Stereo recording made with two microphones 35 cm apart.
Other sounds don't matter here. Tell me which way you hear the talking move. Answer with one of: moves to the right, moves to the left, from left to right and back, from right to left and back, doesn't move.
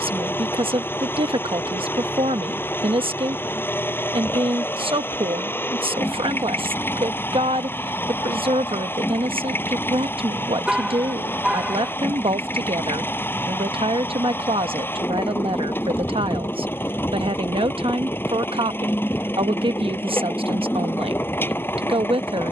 doesn't move.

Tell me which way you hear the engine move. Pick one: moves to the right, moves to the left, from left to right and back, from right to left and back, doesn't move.
doesn't move.